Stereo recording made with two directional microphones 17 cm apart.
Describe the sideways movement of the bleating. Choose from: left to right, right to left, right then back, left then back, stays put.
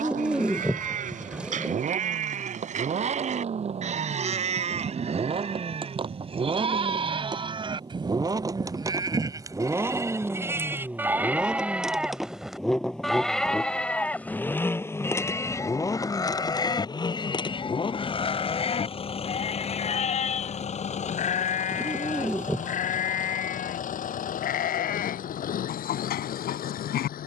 right to left.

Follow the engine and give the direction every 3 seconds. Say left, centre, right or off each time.
right, right, right, centre, centre, left, left, left, left.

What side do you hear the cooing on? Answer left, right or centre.
centre.